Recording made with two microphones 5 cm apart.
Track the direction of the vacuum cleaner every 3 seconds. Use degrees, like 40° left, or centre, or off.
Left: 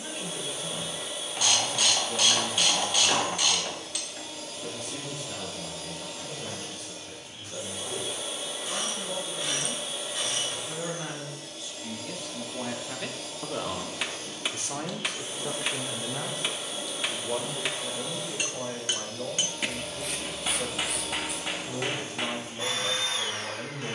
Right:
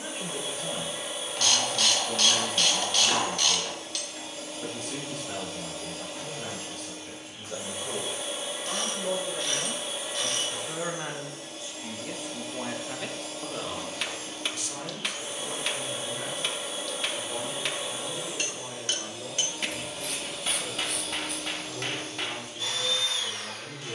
30° right, 30° right, 30° right, 30° right, 30° right, 30° right, 10° right, 20° left.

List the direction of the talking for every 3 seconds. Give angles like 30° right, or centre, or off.
60° right, 60° right, 60° right, 40° right, 10° left, 60° left, 70° left, 70° left.